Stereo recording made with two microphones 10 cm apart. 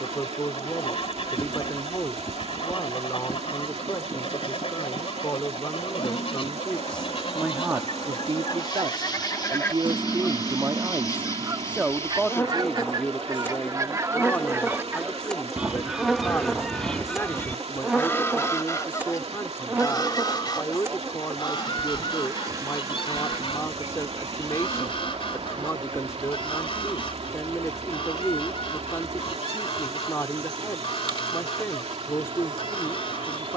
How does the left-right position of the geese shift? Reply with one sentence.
In this clip you hear the geese move from left to right and back again.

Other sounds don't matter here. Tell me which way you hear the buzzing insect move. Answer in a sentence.
You can hear the buzzing insect travel towards the right.